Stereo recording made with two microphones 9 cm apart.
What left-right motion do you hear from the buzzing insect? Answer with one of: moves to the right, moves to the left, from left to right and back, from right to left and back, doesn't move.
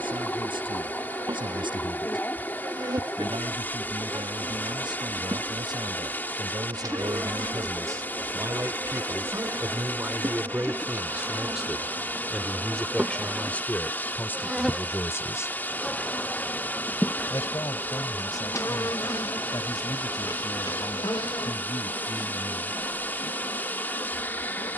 moves to the left.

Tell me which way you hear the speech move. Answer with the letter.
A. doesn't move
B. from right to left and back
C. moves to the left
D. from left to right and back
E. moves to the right
C.